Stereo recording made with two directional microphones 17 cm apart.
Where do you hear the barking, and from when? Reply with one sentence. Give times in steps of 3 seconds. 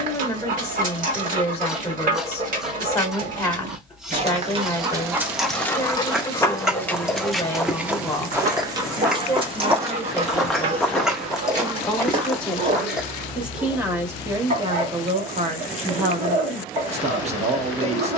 You can hear the barking on the right from 0 s, in the centre from 6 s and on the right from 9 s.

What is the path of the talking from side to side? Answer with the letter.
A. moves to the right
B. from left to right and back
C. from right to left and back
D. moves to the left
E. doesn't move
A.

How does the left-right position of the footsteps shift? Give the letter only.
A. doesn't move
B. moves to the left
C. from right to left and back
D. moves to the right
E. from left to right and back
C.